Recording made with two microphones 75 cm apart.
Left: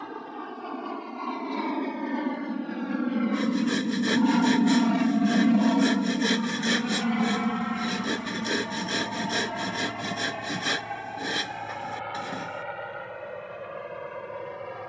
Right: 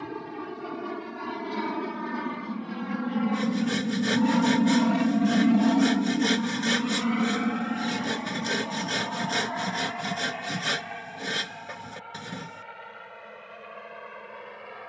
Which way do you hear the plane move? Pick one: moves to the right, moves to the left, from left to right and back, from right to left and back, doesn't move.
moves to the left.